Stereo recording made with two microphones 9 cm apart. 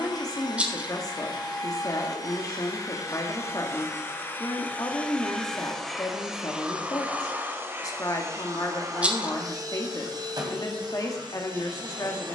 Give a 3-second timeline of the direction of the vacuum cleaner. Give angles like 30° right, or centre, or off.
50° left, 20° left, 20° right, 50° right.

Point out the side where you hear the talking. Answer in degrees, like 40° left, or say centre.
40° left.